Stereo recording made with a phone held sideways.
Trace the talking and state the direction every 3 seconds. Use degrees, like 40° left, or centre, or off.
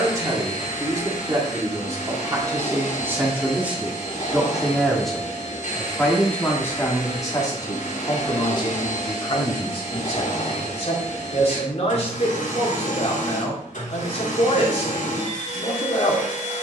20° right, 10° right, 20° left, 50° left, 50° left, 50° left.